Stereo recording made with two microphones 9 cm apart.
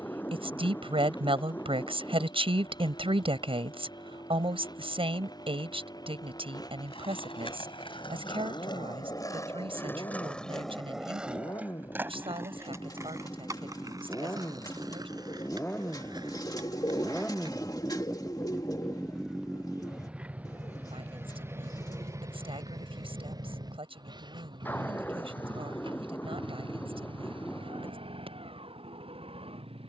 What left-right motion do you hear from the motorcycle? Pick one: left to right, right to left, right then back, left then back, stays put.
left to right.